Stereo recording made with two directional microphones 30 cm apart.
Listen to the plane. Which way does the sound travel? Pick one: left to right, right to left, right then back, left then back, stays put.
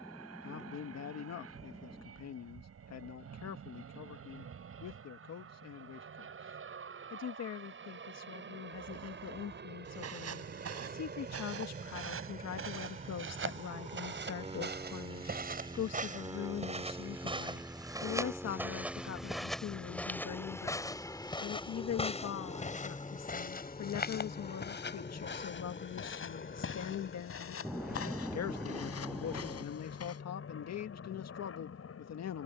right to left.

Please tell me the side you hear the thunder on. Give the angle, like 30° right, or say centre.
centre.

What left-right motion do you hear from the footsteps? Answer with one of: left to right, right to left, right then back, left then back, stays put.
right to left.